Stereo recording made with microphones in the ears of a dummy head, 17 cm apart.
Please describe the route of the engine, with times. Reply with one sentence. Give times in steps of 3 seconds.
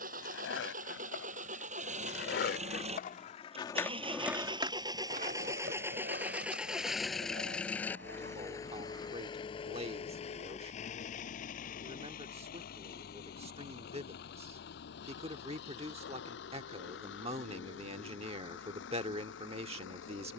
You can hear the engine on the right from 0 s, in the centre from 6 s and on the left from 9 s.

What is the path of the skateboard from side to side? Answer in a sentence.
In this clip you hear the skateboard move from left to right.